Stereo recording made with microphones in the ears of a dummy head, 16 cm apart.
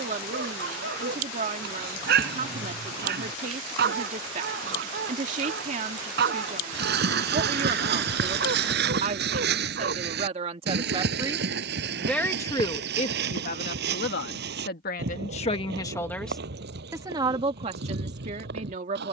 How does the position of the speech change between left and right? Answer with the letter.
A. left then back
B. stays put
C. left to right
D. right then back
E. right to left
A.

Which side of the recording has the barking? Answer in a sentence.
You can hear the barking on the right.